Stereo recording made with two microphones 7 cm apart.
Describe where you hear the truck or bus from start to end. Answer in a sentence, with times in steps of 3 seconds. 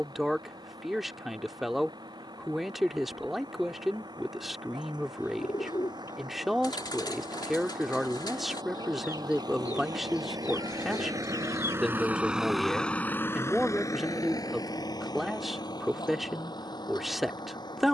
In this clip you hear the truck or bus on the right from 0 s and on the left from 12 s.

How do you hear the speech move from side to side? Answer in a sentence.
In this clip you hear the speech stay in one place.